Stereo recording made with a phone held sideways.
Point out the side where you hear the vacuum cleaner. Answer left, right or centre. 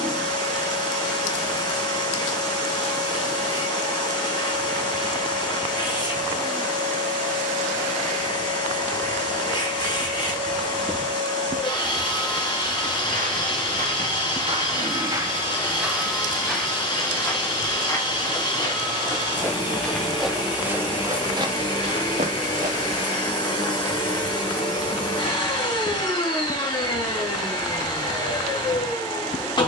left.